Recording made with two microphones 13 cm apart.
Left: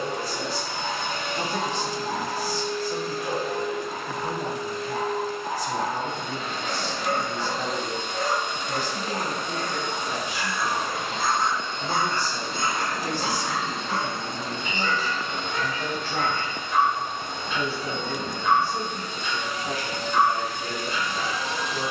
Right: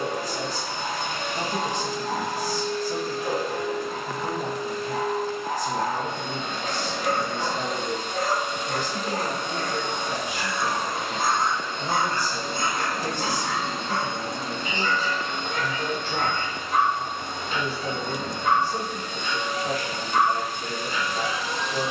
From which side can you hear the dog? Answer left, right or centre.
right.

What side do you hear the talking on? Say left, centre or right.
right.